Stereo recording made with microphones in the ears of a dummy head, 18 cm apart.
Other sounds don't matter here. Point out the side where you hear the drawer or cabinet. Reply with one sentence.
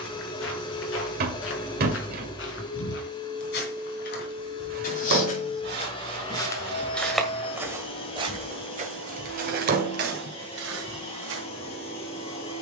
You can hear the drawer or cabinet on the right.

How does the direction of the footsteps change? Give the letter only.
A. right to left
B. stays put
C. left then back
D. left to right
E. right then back
D.